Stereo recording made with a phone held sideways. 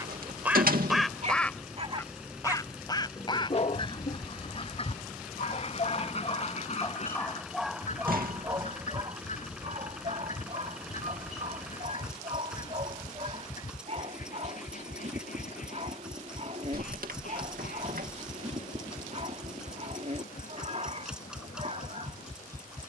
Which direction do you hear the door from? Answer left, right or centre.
right.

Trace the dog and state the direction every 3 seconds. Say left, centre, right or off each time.
right, left, centre, right, right, right, right, right.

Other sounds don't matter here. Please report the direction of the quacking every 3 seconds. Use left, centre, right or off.
centre, left, left, left, left, left, left, left.